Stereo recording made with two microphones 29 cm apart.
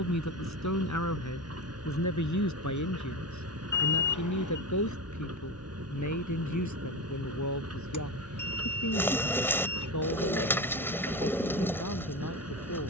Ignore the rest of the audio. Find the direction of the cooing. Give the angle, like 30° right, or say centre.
10° left.